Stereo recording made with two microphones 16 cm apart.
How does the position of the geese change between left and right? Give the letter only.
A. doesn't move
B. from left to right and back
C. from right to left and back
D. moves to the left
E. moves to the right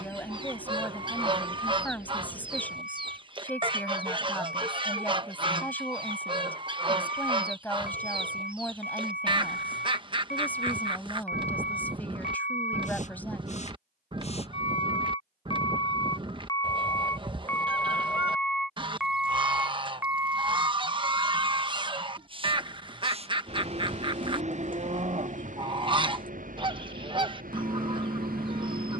A.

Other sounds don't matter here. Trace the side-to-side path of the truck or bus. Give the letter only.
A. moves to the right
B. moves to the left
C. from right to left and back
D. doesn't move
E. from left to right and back
A.